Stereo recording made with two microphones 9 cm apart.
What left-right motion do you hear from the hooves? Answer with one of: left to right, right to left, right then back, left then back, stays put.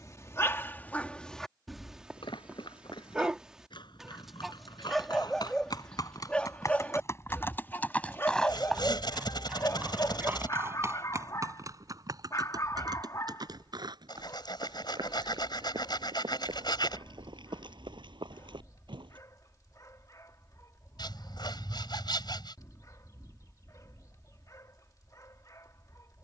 left to right.